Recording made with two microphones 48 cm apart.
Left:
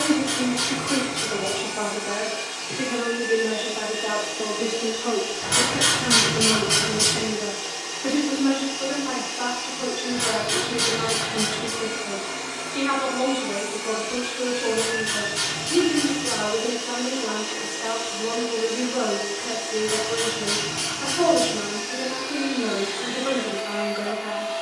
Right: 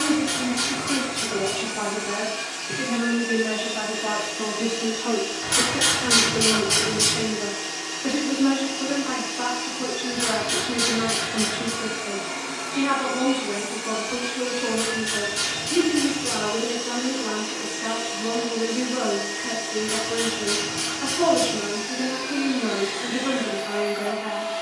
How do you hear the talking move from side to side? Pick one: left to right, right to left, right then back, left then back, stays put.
right to left.